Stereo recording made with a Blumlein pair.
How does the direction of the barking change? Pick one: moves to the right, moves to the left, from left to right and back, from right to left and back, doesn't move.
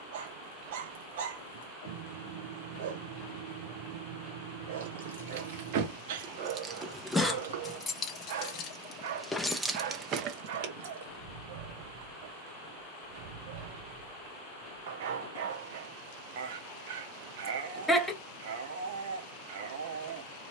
doesn't move.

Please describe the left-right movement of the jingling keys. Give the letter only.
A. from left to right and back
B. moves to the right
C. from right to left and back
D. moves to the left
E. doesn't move
C.